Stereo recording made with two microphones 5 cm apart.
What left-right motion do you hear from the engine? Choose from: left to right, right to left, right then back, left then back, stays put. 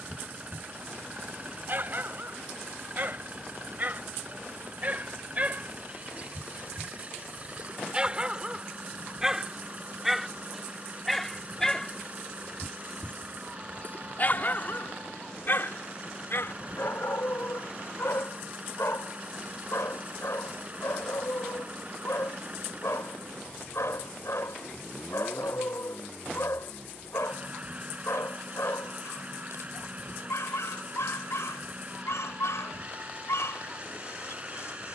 stays put.